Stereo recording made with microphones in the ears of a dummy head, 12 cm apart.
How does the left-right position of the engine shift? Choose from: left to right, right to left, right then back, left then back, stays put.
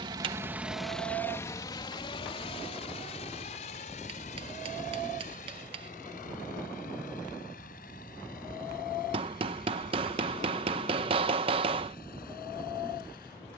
right to left.